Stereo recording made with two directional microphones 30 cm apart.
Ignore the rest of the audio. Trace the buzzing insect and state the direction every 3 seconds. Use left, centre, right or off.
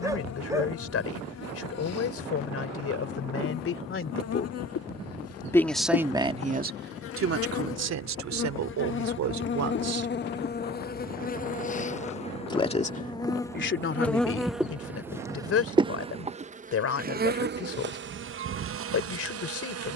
left, left, left, left, centre, right, right.